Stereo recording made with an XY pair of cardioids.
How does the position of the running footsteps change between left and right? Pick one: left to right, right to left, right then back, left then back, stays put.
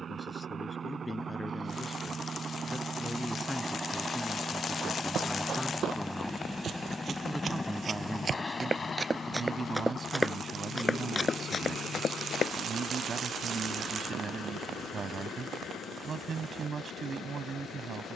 right to left.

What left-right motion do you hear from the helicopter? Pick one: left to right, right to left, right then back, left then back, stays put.
right to left.